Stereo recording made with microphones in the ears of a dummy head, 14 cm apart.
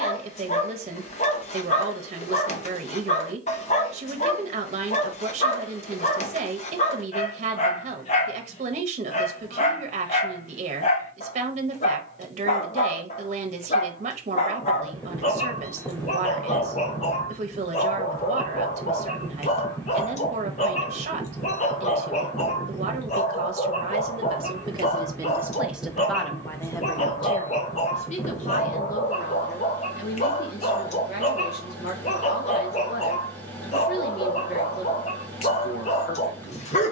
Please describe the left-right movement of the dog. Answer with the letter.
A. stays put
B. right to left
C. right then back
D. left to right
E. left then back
A.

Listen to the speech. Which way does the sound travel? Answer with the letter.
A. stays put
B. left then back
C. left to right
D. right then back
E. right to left
E.